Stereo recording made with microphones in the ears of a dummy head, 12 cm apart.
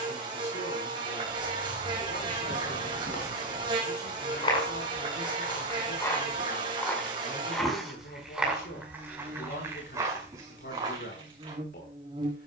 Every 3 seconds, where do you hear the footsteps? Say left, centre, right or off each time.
left, left, centre, right.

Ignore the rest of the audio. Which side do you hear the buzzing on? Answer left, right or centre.
right.